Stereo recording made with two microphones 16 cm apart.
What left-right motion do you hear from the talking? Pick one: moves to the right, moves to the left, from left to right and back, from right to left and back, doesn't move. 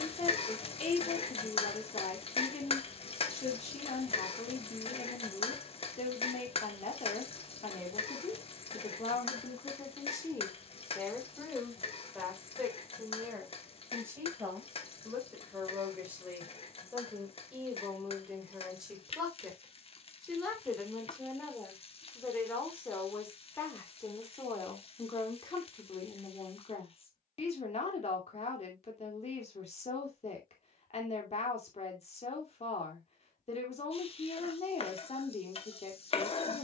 from left to right and back.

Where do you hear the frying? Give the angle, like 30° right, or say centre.
40° left.